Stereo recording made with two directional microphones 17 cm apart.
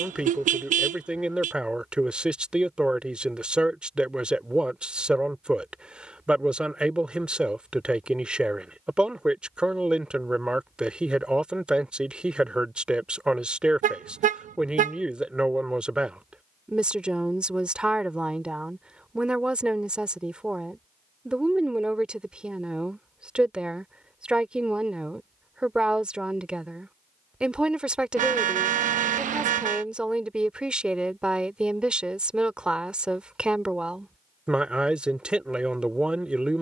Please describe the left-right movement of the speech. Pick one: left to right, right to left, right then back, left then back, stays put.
stays put.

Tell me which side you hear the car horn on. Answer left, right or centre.
right.